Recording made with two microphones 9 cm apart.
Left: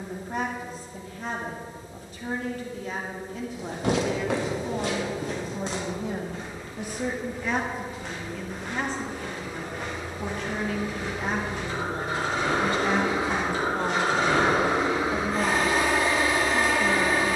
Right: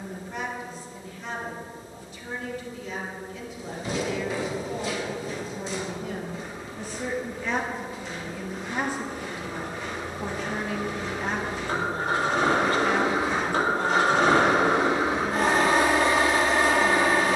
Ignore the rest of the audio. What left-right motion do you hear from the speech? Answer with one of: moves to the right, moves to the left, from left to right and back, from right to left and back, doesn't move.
from left to right and back.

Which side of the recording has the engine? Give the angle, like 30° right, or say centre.
60° right.